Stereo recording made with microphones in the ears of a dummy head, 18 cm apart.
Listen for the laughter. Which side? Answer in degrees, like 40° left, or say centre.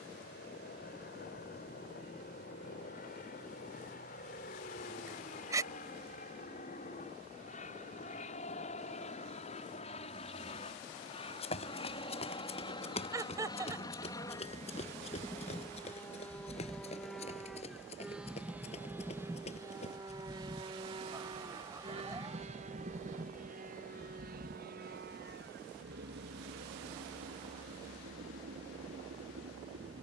20° right.